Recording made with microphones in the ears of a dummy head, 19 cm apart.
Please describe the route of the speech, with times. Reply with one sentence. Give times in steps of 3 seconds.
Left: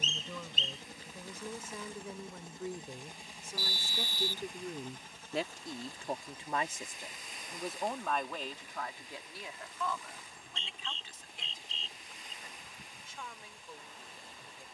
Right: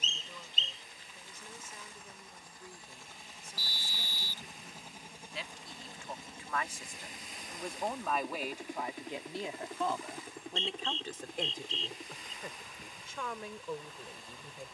In this clip you hear the speech on the left from 0 s, in the centre from 6 s and on the right from 9 s.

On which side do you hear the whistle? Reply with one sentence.
In this clip you hear the whistle on the left.